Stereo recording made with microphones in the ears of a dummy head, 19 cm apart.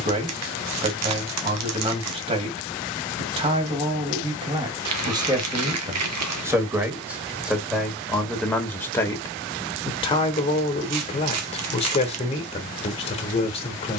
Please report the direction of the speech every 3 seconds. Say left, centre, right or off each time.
right, right, centre, left, left.